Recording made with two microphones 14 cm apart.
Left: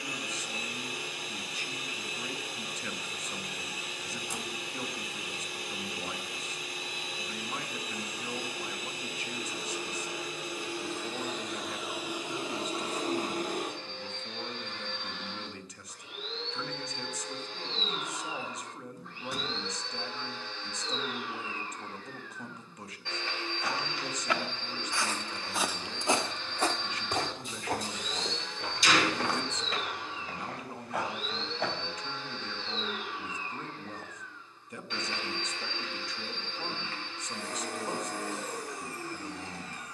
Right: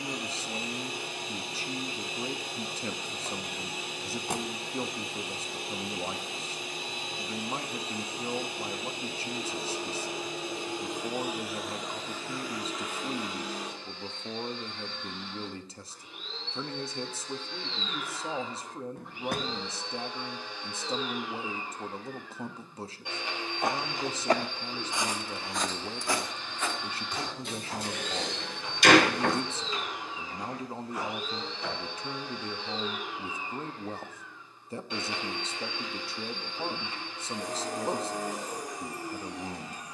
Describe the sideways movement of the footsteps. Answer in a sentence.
You can hear the footsteps move from right to left.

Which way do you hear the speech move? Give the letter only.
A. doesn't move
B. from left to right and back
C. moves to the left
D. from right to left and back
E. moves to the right
A.